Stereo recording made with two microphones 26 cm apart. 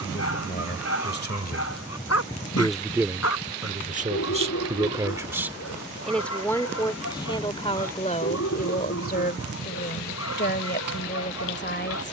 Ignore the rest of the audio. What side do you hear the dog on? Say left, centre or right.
left.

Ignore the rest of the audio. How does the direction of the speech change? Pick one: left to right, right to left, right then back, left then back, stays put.
right then back.